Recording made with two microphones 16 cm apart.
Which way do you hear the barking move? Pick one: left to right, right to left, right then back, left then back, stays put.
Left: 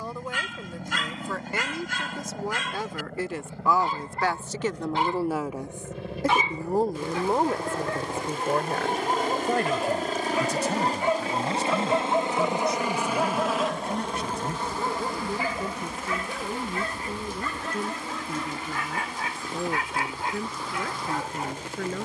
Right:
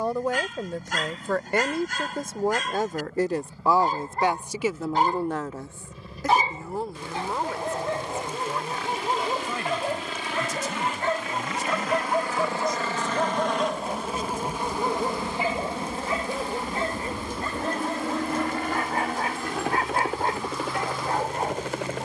left then back.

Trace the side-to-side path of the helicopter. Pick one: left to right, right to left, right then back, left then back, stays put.
left to right.